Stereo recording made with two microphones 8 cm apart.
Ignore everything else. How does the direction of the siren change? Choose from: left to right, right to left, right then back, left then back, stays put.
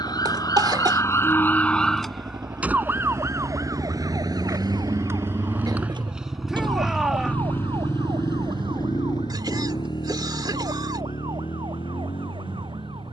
left to right.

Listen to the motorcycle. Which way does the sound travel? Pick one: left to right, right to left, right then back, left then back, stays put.
right to left.